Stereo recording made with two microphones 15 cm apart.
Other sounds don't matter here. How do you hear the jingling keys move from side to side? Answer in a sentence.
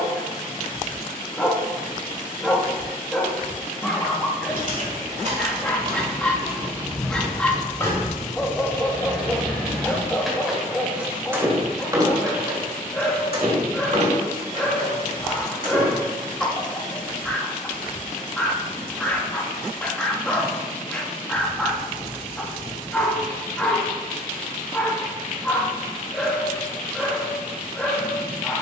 In this clip you hear the jingling keys move from right to left and back again.